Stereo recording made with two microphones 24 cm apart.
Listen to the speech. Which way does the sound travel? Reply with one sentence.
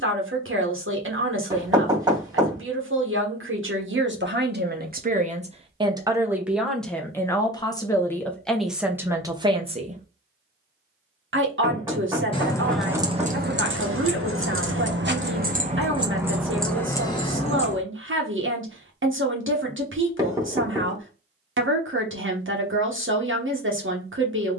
In this clip you hear the speech move from right to left and back again.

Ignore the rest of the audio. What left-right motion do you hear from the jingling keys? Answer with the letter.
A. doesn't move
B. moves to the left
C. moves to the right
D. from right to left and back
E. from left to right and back
E.